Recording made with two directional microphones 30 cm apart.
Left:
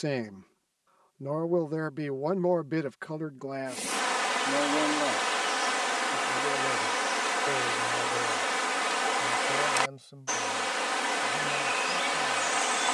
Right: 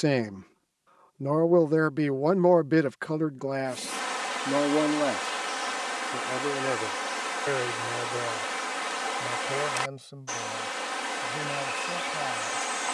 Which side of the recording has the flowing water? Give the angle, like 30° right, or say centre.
20° left.